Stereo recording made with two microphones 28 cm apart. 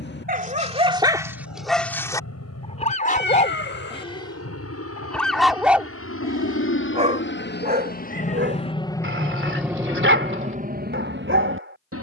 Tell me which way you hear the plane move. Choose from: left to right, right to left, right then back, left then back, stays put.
left to right.